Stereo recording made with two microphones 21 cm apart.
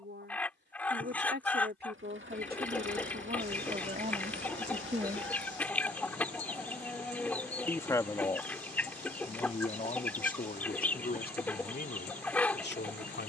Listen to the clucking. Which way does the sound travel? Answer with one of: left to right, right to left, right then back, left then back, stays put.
stays put.